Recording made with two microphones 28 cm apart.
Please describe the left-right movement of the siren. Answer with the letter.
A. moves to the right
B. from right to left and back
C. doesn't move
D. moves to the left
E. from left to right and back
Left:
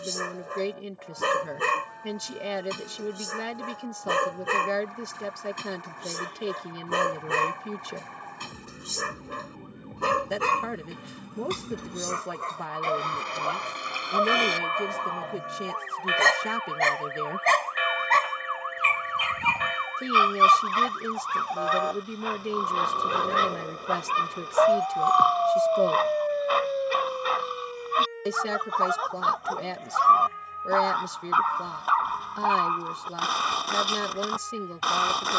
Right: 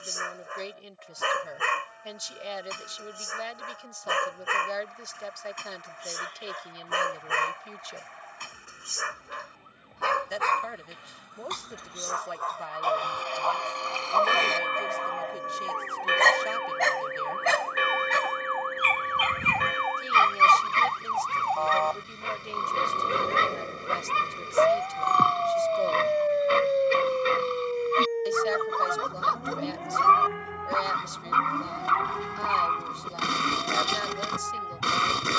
A.